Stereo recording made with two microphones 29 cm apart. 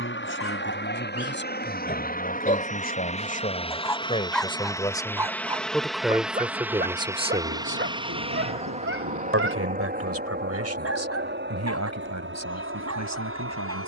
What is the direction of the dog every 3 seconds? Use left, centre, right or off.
left, centre, right, right, right.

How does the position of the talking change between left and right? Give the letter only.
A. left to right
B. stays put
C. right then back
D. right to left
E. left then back
A.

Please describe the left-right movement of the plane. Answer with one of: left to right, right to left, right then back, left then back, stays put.
left to right.